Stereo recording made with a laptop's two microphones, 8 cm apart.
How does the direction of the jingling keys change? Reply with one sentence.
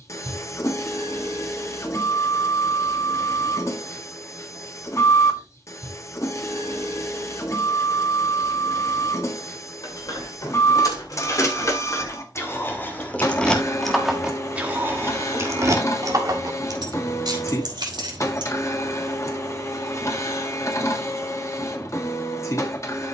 You can hear the jingling keys move from left to right.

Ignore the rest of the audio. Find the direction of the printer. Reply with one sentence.
You can hear the printer on the left.